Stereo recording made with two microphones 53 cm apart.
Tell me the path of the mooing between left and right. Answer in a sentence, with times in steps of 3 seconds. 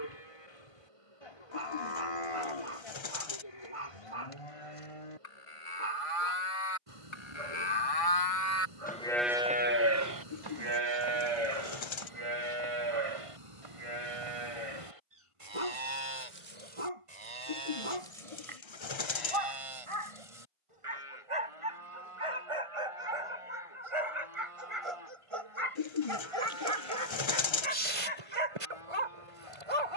In this clip you hear the mooing on the left from 0 s and on the right from 9 s.